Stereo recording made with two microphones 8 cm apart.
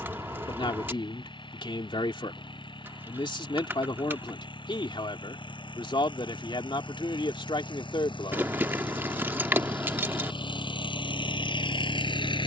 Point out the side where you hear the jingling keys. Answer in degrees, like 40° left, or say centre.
30° right.